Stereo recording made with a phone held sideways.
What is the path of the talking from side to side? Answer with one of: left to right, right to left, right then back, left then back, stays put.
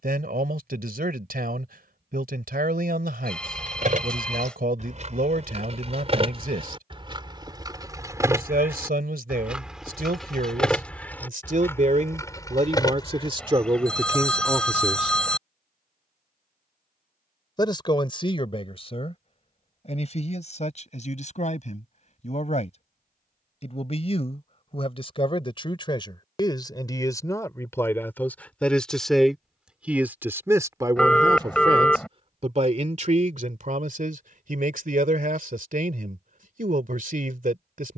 left then back.